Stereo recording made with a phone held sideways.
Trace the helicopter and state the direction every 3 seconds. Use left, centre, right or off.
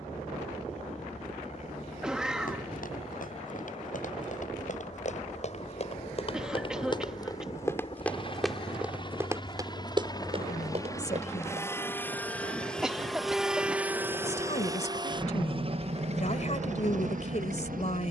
left, left, left, left, centre, right.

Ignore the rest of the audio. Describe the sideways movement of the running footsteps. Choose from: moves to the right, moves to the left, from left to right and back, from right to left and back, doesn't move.
moves to the right.